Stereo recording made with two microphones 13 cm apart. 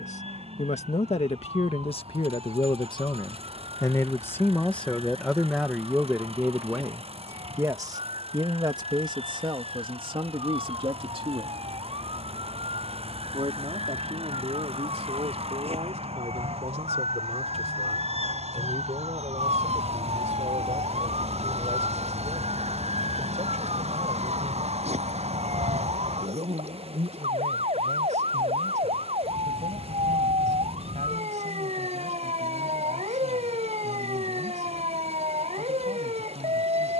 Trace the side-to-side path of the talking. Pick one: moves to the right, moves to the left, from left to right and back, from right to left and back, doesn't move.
moves to the right.